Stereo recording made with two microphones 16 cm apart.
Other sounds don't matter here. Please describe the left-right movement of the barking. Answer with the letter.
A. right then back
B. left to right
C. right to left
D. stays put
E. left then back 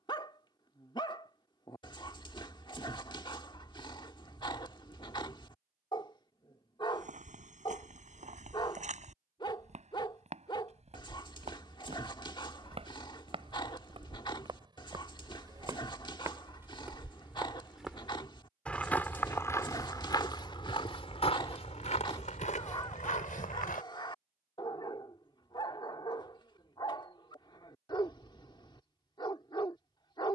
D.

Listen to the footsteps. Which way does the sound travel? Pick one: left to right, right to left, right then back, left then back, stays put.
right to left.